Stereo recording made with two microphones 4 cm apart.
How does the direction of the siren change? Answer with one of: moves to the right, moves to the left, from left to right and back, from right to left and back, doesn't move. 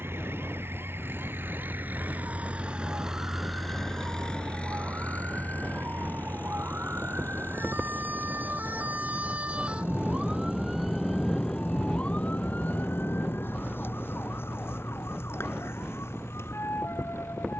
moves to the left.